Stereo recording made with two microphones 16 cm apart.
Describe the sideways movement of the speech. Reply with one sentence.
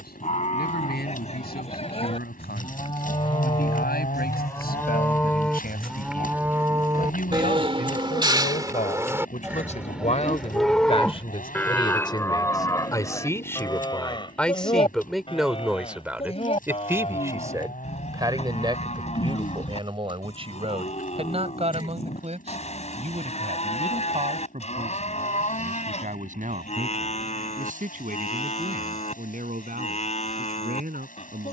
In this clip you hear the speech move to the right.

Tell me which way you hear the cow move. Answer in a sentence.
You can hear the cow go right and come back.